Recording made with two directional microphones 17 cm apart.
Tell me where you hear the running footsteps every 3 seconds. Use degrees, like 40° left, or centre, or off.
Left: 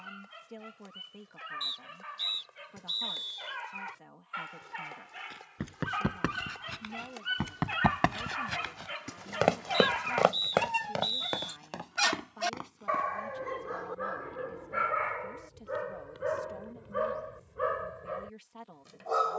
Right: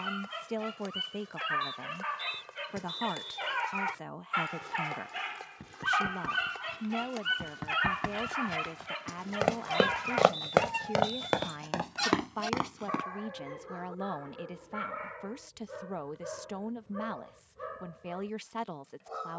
off, 70° left, 50° left, 20° right, 60° right, off, off.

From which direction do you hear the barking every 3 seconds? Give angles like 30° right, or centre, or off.
60° right, 50° right, 20° right, 10° left, 40° left, 50° left, 60° left.